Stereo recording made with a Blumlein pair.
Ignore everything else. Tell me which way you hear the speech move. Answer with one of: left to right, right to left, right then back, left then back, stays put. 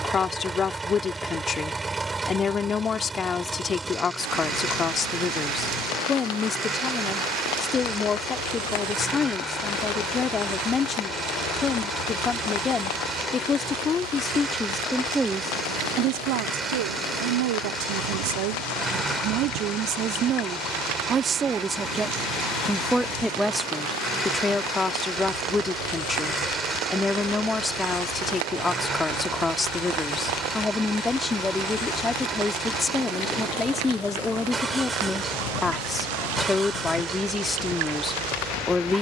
right then back.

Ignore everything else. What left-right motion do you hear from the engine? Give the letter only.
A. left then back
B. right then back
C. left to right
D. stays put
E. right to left
D.